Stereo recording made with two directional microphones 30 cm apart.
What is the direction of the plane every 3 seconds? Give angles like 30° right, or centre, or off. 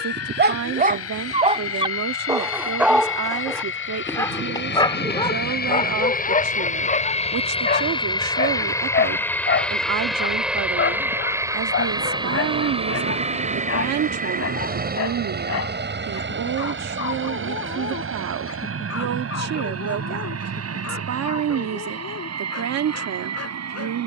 50° left, 40° left, 20° left, centre, 20° right, 40° right, 50° right, 50° right.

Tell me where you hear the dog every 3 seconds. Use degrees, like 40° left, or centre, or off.
20° right, 10° left, 30° left, 40° left, 50° left, 50° left, 50° left, 50° left.